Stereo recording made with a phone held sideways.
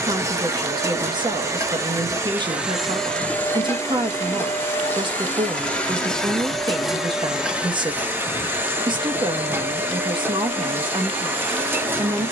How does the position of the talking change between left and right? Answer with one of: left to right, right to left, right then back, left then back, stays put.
stays put.